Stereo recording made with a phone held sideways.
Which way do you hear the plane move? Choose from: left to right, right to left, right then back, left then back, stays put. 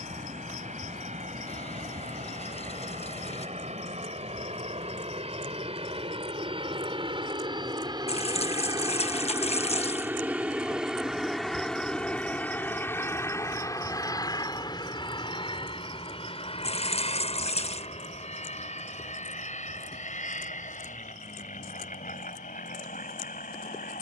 right to left.